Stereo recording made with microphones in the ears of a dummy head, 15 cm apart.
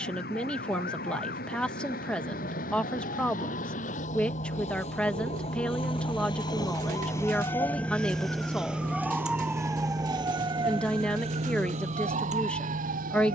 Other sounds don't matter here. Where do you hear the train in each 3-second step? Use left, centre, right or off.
left, left, centre, right, right.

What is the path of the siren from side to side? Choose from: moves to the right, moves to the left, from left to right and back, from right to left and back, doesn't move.
moves to the right.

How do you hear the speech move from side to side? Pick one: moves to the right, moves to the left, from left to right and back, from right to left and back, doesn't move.
doesn't move.